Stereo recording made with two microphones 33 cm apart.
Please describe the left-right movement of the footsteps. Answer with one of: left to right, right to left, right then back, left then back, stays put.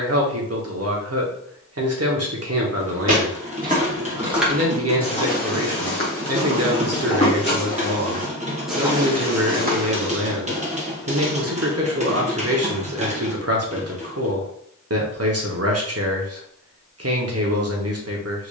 left then back.